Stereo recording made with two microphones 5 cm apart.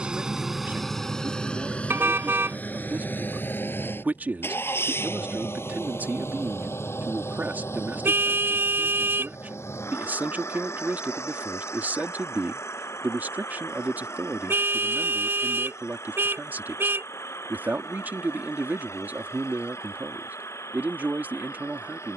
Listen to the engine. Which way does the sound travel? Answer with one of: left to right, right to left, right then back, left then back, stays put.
right to left.